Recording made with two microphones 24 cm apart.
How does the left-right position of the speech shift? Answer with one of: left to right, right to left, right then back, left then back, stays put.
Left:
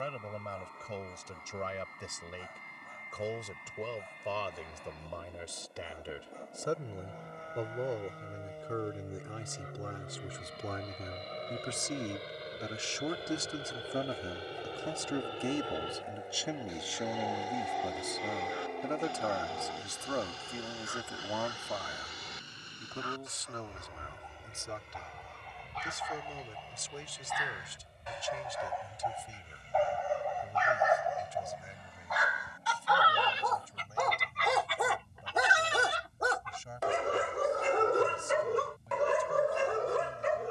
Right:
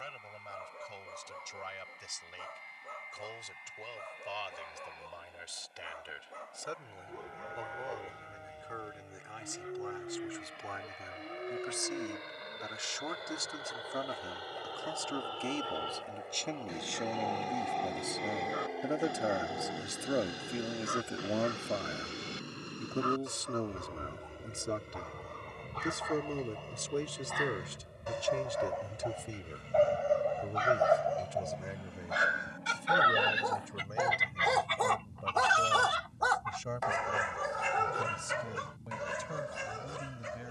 left to right.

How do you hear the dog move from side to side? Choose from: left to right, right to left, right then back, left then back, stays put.
right to left.